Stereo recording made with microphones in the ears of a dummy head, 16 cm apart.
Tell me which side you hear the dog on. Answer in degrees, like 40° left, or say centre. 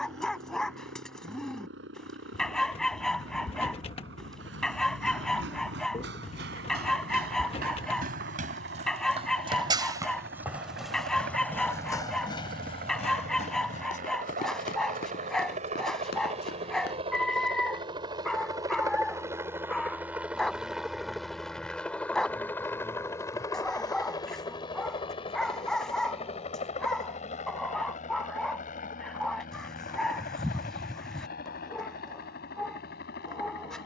centre.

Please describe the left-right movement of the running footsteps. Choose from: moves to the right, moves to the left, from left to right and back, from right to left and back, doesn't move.
moves to the left.